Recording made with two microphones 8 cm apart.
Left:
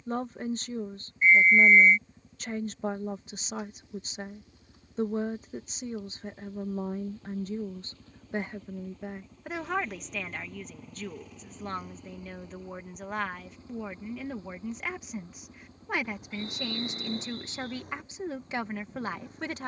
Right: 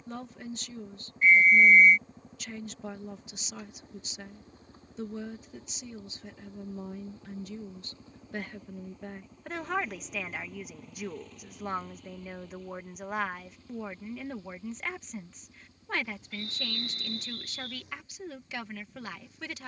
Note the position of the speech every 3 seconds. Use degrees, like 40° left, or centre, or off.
40° left, 40° left, 40° left, 10° right, centre, 20° left, 40° left.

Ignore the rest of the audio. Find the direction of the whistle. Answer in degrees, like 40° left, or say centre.
30° left.